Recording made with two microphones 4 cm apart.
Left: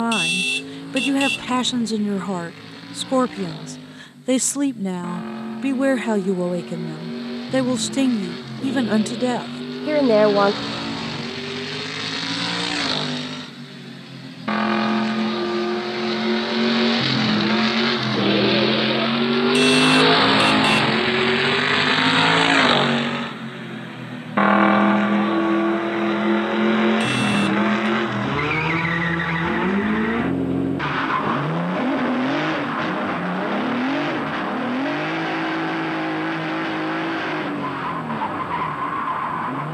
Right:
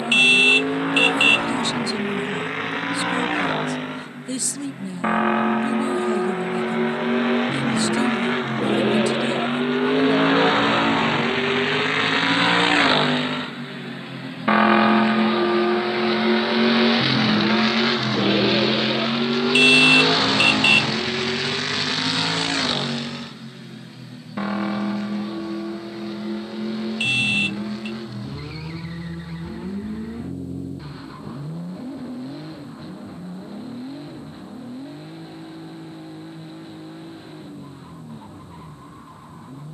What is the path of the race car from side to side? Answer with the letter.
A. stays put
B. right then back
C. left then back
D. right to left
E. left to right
D.